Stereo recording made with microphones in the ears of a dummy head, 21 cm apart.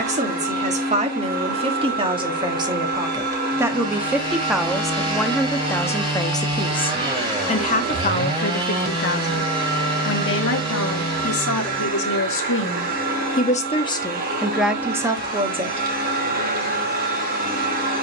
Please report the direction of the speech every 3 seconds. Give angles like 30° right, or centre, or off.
20° right, centre, 30° left, 50° left, 30° left, 20° right.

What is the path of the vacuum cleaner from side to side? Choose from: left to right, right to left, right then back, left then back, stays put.
stays put.